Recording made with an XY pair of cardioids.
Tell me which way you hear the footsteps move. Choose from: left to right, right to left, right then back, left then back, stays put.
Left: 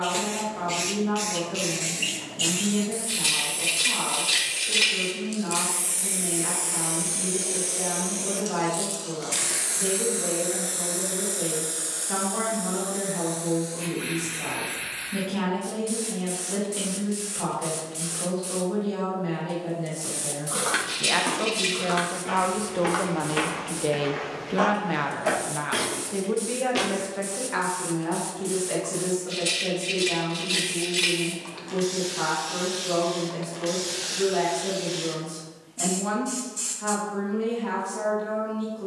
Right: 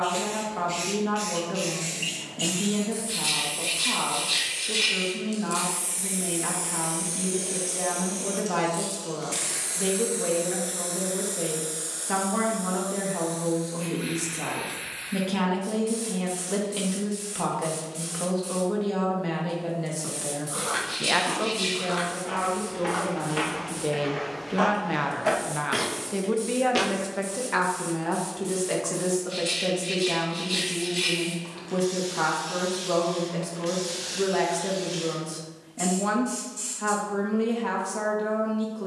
left to right.